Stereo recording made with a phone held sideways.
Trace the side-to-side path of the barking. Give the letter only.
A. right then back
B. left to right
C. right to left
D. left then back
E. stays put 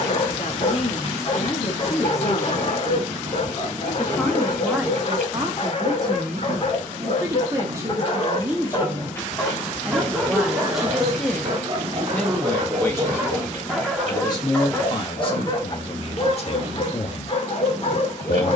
A.